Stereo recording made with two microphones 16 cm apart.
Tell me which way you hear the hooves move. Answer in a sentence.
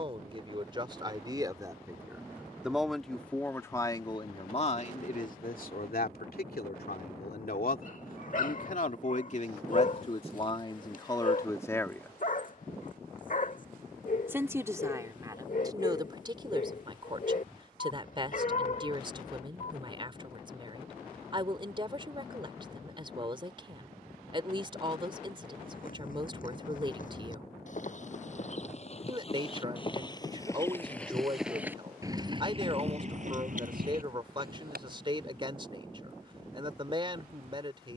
You can hear the hooves travel towards the right.